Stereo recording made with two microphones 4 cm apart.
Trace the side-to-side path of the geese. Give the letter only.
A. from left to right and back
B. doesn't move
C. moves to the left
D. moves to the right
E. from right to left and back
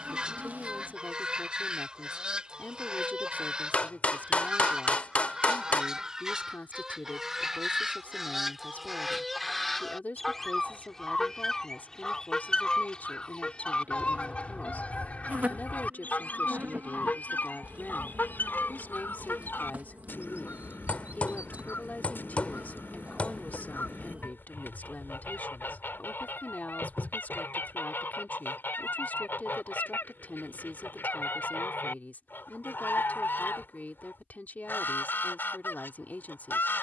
C.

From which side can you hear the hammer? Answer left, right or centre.
left.